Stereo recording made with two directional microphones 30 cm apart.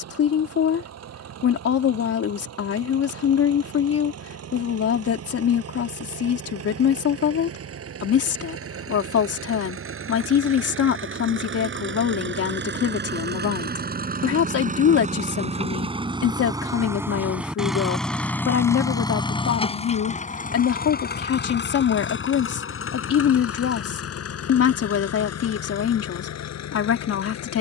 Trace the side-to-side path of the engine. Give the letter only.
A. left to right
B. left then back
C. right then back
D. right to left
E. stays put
D.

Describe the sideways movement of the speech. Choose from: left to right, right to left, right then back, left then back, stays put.
stays put.